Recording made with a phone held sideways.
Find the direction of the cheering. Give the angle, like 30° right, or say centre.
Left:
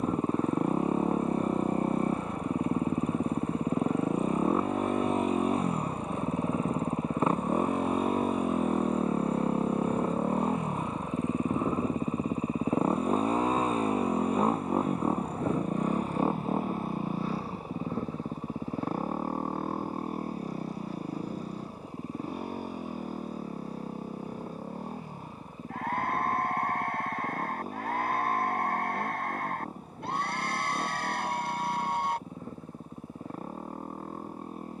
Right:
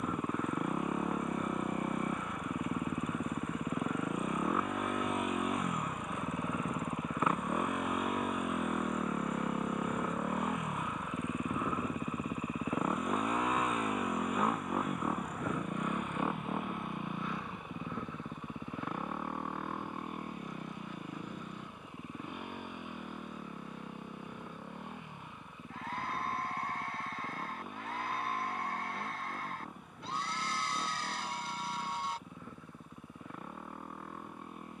50° left.